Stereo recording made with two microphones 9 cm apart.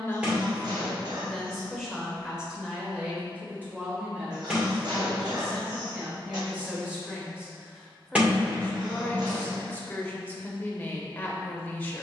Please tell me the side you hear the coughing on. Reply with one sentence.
In this clip you hear the coughing on the right.